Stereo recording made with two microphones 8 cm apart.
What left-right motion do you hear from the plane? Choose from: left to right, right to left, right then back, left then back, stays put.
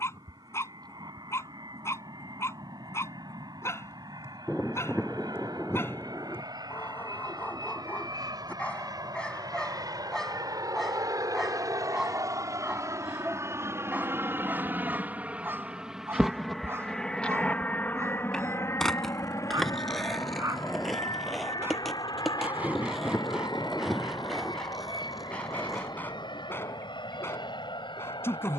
right to left.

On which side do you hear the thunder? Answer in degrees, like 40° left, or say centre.
10° left.